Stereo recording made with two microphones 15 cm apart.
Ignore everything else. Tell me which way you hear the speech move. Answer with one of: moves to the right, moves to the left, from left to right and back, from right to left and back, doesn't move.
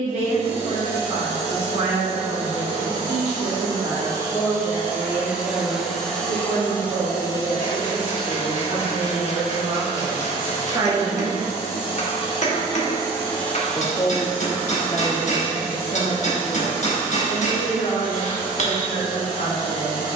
moves to the left.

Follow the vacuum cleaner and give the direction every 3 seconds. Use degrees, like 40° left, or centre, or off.
40° right, 20° right, 20° left, 50° left, 10° left, 30° right, 30° right.